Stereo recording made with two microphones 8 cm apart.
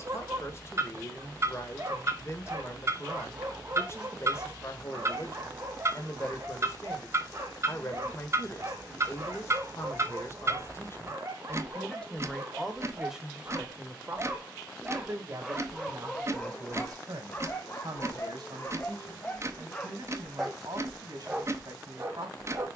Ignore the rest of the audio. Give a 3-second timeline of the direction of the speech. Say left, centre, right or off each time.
left, left, left, left, centre, right, right, right.